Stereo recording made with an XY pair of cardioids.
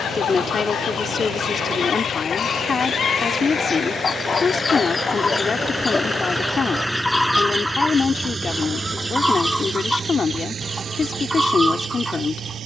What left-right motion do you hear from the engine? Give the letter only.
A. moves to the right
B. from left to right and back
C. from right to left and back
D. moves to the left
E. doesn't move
A.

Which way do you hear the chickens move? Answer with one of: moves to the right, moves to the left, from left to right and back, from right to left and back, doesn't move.
moves to the right.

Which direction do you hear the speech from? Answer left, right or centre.
left.